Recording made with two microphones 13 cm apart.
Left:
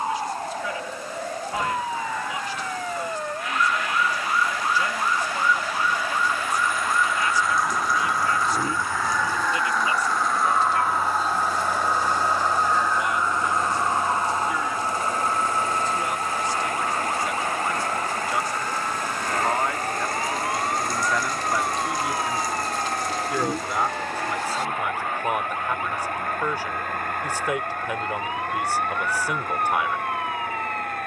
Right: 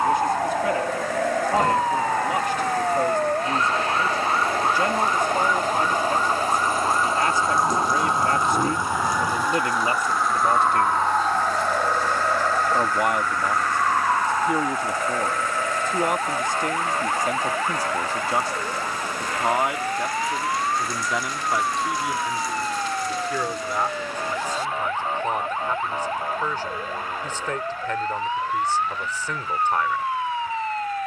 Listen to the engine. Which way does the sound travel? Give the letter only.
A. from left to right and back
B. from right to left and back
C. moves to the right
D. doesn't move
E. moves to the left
E.